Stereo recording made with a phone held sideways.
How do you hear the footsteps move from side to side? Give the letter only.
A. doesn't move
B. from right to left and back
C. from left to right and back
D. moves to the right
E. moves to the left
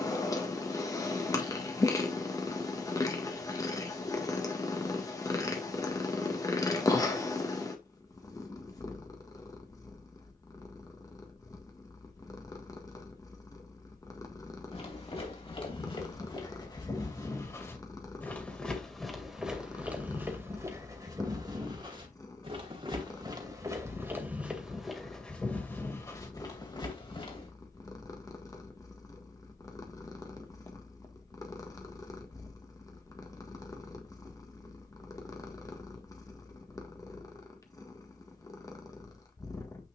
C.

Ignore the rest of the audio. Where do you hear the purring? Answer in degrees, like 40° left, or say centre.
20° left.